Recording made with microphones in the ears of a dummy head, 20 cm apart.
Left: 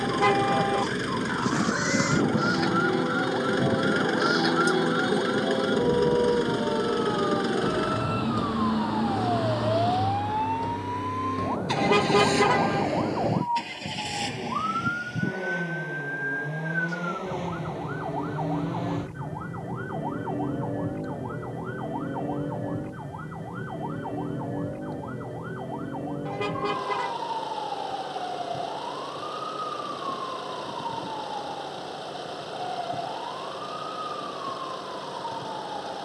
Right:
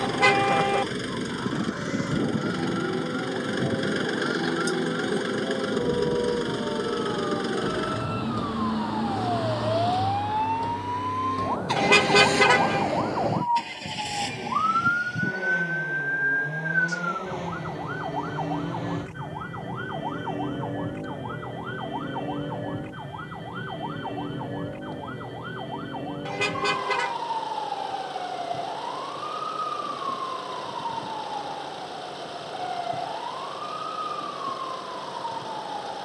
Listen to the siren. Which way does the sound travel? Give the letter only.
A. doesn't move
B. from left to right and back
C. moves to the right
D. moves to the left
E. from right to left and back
C.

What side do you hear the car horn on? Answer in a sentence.
You can hear the car horn on the right.